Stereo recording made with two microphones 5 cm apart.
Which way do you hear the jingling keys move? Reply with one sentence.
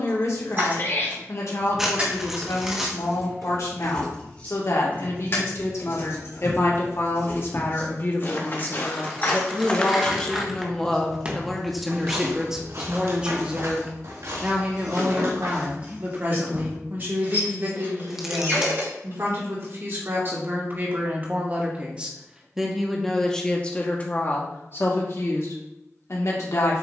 You can hear the jingling keys move from right to left and back again.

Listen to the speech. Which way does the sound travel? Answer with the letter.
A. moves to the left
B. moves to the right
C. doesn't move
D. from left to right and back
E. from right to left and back
D.